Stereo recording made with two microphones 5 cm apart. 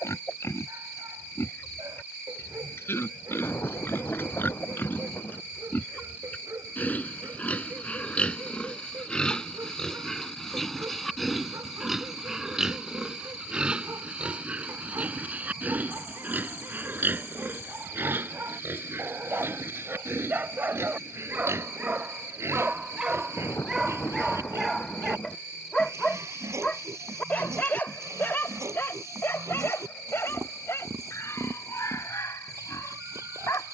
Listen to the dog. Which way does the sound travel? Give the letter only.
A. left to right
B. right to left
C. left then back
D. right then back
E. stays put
B.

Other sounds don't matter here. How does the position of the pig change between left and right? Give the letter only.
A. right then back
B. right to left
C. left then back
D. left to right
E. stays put
D.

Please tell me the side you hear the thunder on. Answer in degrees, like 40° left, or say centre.
50° left.